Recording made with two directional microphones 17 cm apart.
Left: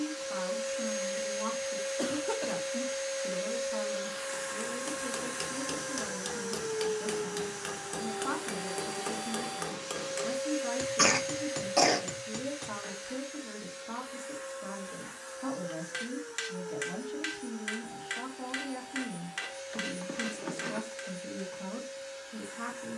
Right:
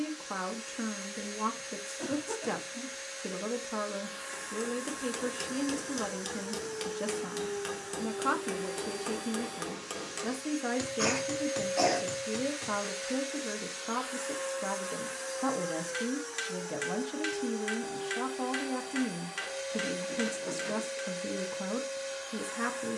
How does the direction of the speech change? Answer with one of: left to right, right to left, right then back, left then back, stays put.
stays put.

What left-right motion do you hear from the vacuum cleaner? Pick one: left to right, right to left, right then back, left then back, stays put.
left to right.